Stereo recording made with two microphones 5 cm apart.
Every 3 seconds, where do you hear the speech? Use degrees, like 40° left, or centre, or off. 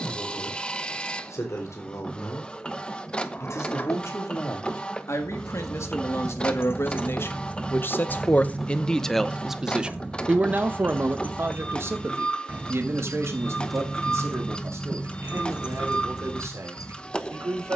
80° left, 70° left, 50° left, 30° right, 70° right, 70° right.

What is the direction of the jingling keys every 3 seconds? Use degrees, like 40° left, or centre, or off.
off, 70° left, 30° left, 40° right, centre, 60° left.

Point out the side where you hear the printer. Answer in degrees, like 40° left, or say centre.
20° left.